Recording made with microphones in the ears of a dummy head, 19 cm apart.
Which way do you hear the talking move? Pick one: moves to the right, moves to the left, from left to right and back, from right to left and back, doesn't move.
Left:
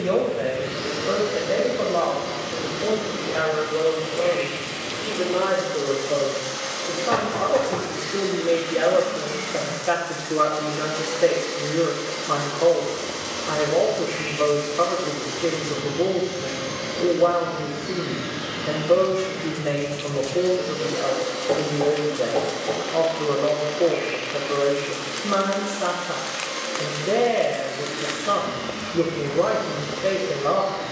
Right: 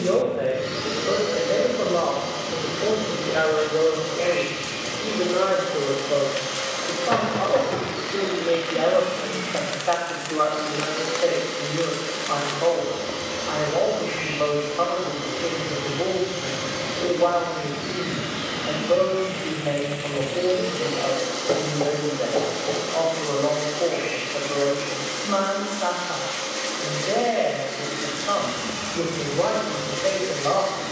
moves to the left.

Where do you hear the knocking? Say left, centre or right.
centre.